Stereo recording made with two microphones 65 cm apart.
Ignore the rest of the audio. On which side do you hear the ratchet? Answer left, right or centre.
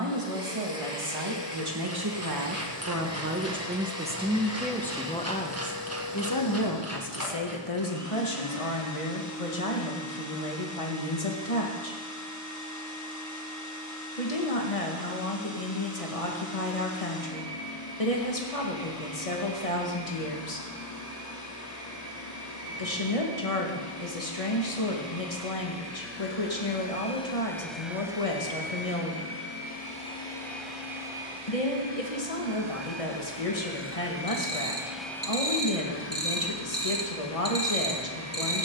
right.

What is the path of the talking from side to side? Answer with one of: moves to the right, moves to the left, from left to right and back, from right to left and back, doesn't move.
moves to the left.